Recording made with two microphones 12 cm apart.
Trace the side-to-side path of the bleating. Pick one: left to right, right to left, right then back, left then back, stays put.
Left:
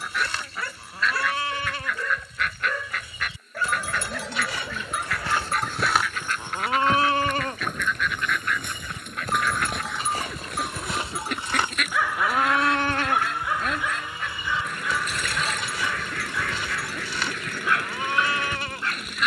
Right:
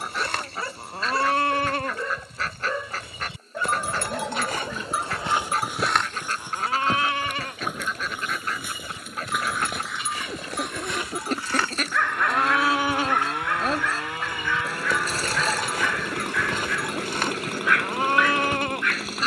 left then back.